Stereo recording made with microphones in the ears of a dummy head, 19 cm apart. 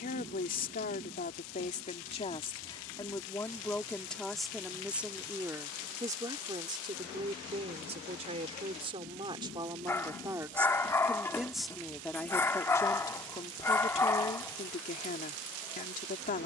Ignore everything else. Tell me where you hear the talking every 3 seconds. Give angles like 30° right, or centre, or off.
30° left, centre, 30° right, 10° right, 20° left, 40° left.